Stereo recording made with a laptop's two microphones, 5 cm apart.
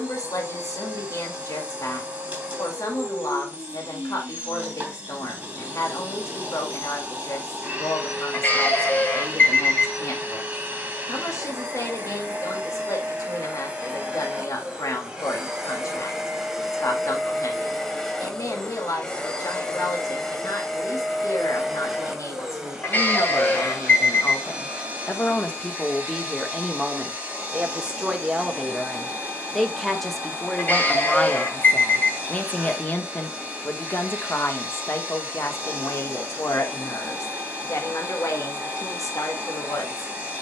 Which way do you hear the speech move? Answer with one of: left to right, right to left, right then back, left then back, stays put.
right then back.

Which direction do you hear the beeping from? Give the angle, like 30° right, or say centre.
40° left.